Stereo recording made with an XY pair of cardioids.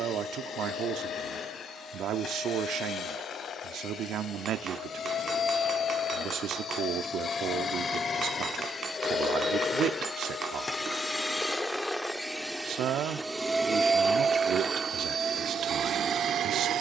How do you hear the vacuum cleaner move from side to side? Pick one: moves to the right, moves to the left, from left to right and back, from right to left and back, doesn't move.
moves to the right.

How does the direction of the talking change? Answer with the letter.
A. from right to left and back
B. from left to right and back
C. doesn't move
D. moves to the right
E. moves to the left
C.